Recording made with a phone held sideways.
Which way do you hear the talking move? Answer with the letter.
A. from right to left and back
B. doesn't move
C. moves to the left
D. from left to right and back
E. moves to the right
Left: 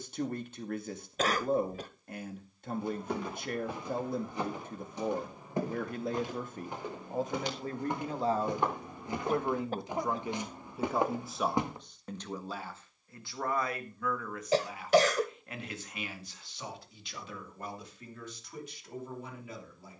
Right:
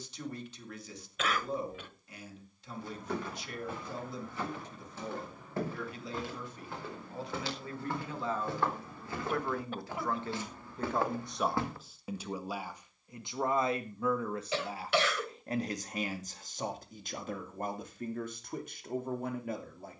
E.